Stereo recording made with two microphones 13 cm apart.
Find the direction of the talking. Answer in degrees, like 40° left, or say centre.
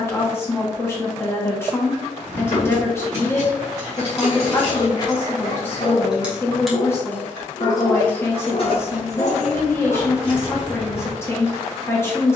20° left.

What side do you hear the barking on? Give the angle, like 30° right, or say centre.
70° left.